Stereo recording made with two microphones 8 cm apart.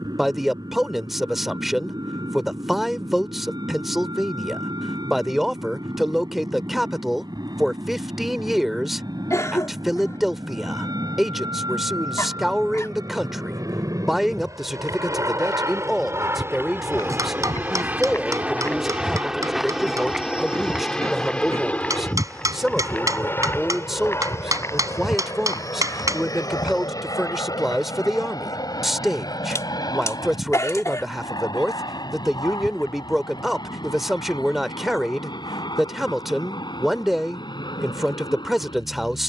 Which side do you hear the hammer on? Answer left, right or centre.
right.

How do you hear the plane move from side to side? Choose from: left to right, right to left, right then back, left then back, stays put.
right to left.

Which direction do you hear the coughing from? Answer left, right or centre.
left.